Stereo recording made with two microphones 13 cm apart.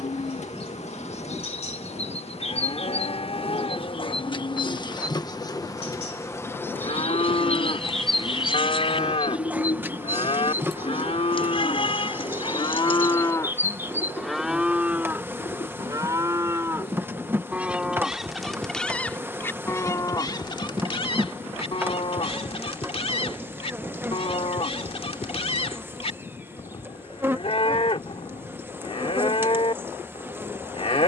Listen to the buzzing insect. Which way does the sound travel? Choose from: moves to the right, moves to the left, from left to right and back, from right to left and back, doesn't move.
moves to the right.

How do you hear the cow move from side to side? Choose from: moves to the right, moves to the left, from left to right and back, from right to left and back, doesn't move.
from left to right and back.